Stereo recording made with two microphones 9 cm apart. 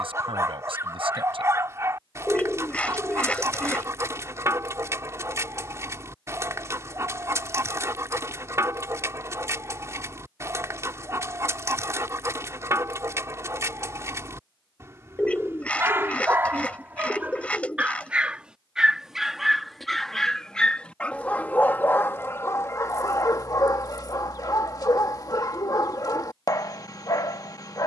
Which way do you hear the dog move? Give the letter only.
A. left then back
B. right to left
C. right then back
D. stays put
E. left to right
B.